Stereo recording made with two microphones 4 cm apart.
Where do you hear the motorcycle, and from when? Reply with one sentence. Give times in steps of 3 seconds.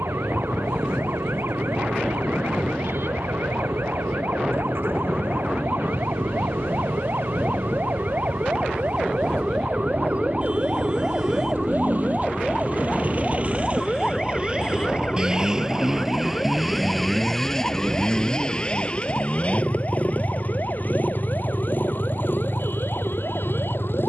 You can hear the motorcycle on the right from 0 s, in the centre from 15 s and on the left from 18 s.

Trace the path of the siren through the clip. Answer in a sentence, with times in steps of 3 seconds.
In this clip you hear the siren on the right from 0 s, in the centre from 12 s and on the left from 15 s.